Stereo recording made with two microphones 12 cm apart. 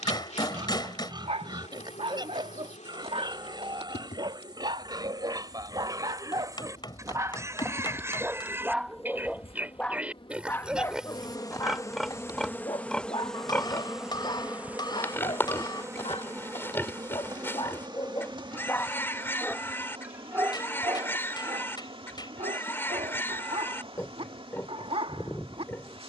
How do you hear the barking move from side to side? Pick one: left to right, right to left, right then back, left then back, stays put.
left then back.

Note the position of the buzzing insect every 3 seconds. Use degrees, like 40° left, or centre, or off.
80° left, 80° left, 70° left, 40° left, centre, 30° right, 50° right, 50° right, 50° right.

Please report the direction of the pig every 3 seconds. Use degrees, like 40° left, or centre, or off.
40° right, 40° right, 20° right, 10° right, 10° left, 20° left, 20° left, 20° left, 20° left.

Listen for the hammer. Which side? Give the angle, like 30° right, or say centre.
40° left.